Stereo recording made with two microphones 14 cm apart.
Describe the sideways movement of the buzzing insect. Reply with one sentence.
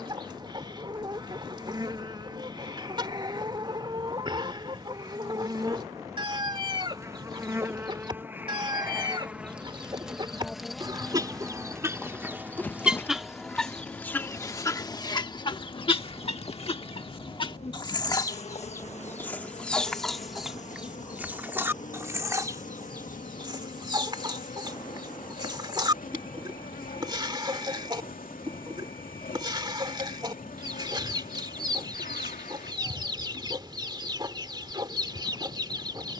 You can hear the buzzing insect go from the right side to the left.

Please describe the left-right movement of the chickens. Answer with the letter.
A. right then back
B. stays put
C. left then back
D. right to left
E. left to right
C.